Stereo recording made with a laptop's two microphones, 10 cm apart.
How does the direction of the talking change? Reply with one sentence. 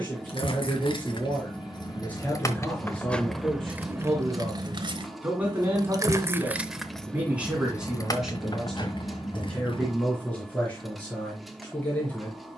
You can hear the talking go right and come back.